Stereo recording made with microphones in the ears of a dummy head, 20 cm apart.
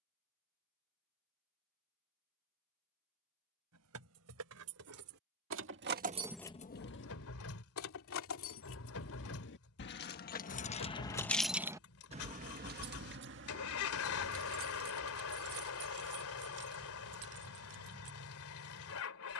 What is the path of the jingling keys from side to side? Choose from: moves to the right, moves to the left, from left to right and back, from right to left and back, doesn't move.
from right to left and back.